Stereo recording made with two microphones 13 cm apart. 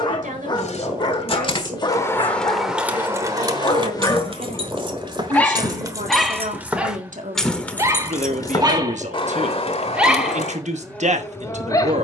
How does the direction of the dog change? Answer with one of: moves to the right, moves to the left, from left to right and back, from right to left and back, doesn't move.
from left to right and back.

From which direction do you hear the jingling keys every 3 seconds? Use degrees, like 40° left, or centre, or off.
20° left, 30° right, centre, 50° left.